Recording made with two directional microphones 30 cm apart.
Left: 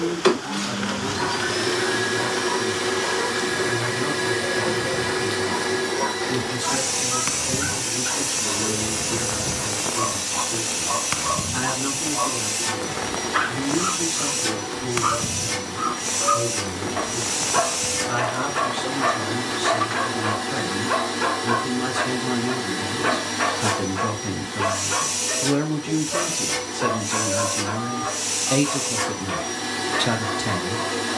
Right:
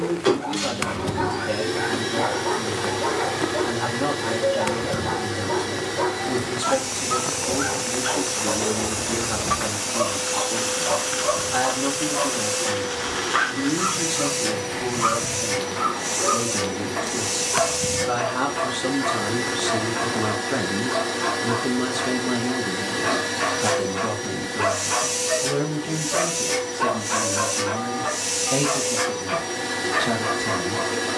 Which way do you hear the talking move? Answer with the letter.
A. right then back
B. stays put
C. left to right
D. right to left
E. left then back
D.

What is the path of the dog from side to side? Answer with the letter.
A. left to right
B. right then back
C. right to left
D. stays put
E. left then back
E.